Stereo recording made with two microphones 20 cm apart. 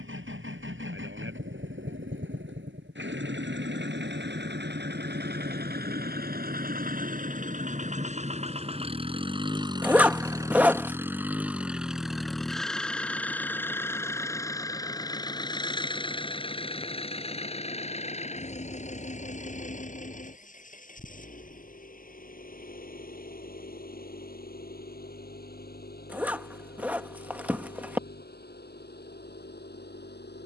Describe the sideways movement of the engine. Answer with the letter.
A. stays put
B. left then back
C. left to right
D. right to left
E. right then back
D.